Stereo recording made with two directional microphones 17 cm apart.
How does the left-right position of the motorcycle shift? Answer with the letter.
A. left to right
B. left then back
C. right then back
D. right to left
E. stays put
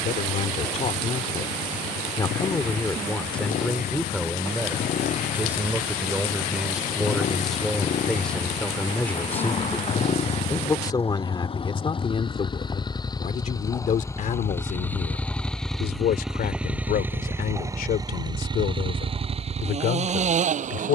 A.